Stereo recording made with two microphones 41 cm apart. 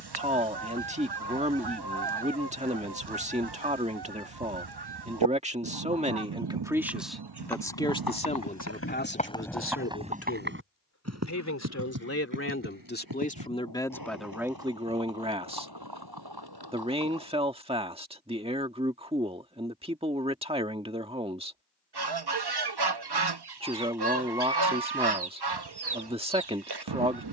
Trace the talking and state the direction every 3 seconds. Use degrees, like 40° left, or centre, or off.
20° right, 20° right, centre, 30° left, 10° left, 10° right, 10° right, 10° right, 10° right.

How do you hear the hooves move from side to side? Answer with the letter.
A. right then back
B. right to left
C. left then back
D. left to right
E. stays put
D.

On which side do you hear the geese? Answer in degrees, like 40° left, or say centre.
70° right.